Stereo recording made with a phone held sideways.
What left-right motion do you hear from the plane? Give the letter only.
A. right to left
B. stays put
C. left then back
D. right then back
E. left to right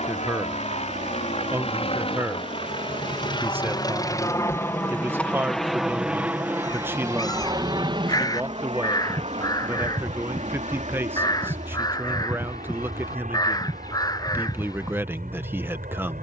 E.